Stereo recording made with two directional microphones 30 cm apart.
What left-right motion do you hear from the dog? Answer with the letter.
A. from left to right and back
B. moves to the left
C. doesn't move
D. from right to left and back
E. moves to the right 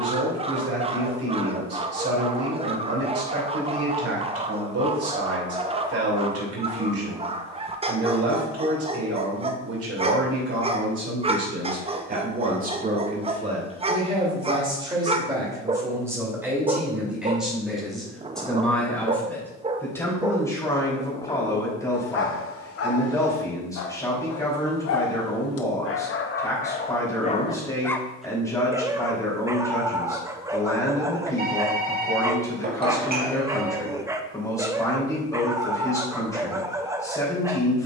D.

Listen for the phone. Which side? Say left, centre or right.
right.